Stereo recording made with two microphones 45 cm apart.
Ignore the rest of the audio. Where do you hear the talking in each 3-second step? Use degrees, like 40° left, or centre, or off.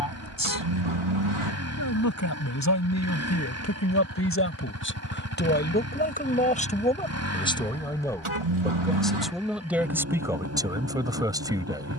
40° left, 30° left, 10° left, 10° right.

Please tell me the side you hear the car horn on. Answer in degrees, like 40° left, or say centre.
80° right.